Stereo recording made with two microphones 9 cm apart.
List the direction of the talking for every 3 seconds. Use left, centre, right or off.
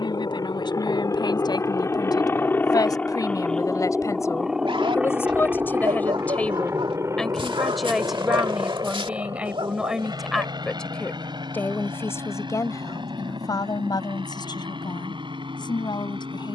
left, left, centre, centre, left, left.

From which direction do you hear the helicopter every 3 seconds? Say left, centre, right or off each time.
left, centre, right, right, right, right.